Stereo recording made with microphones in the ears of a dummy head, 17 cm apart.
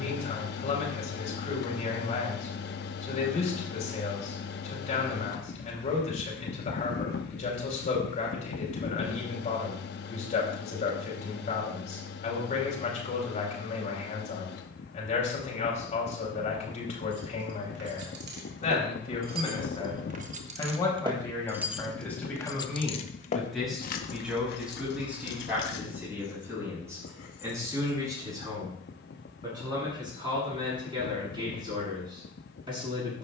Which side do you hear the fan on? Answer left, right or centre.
left.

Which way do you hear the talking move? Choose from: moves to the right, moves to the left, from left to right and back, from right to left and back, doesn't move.
moves to the right.